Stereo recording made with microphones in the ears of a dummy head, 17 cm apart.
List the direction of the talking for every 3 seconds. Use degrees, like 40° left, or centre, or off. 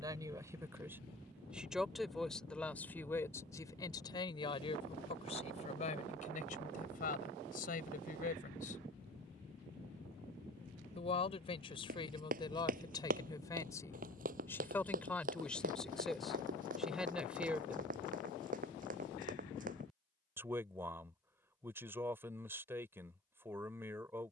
centre, 30° left, 50° left, 30° left, 20° left, centre, 10° right, 10° right.